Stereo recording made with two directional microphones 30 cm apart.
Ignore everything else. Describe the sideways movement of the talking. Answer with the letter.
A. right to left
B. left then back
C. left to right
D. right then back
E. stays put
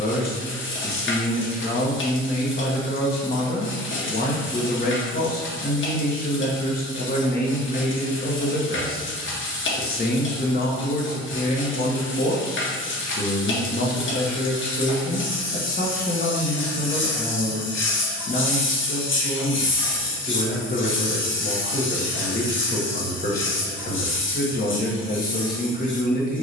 E.